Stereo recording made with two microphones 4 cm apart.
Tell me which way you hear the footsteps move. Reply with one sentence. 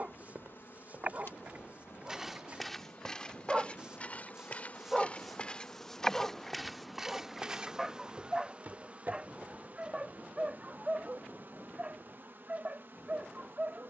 In this clip you hear the footsteps go left and come back.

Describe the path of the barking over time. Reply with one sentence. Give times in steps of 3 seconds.
You can hear the barking on the right from 0 s, in the centre from 3 s and on the right from 9 s.